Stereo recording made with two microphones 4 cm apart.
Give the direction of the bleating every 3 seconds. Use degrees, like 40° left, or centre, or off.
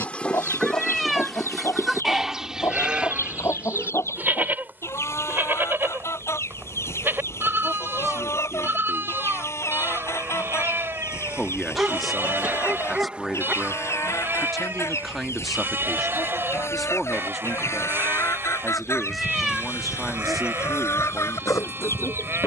10° left, 40° right, 50° right, 50° right, 50° right, 50° right, 50° right, 50° right.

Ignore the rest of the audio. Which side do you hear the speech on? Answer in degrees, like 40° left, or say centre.
centre.